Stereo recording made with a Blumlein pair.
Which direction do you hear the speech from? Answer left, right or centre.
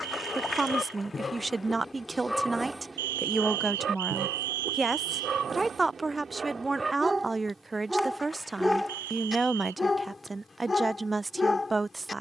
centre.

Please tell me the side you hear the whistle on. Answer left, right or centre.
right.